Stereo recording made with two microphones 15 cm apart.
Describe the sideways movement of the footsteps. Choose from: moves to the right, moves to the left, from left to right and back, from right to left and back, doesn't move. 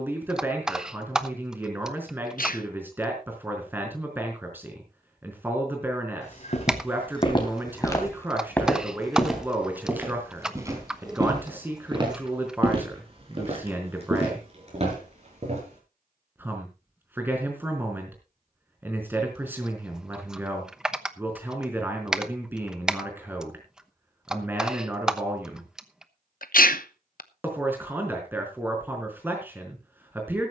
moves to the right.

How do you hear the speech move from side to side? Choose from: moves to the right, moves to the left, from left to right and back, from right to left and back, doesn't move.
doesn't move.